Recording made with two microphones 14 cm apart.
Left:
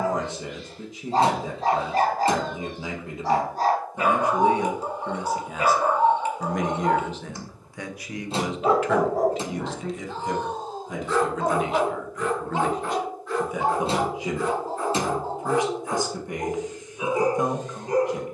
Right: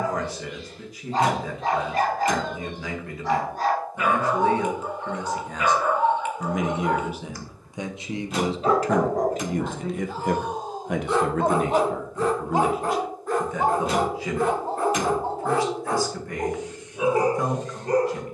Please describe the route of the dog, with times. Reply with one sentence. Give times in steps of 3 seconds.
In this clip you hear the dog on the left from 0 s, in the centre from 9 s and on the right from 12 s.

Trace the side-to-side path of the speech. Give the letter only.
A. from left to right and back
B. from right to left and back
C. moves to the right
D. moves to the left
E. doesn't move
A.